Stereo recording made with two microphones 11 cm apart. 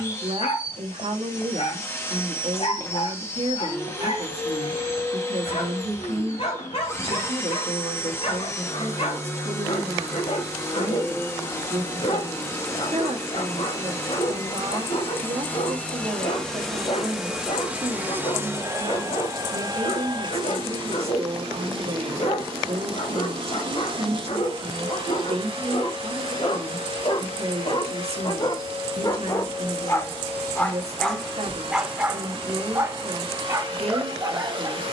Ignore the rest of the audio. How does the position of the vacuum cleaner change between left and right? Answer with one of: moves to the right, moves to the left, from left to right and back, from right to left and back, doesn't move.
moves to the right.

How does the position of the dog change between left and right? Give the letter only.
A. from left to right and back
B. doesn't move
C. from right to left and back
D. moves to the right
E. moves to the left
D.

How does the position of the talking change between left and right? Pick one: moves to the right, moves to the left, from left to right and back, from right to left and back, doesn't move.
doesn't move.